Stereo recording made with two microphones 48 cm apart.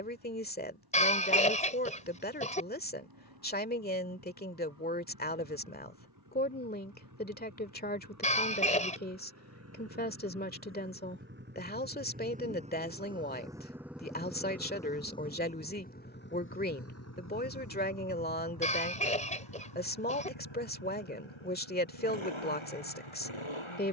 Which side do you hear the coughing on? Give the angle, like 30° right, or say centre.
10° left.